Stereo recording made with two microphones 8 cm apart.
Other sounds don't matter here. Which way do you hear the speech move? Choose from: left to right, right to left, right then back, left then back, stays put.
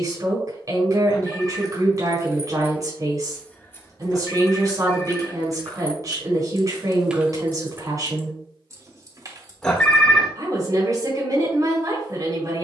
stays put.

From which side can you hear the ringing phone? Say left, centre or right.
centre.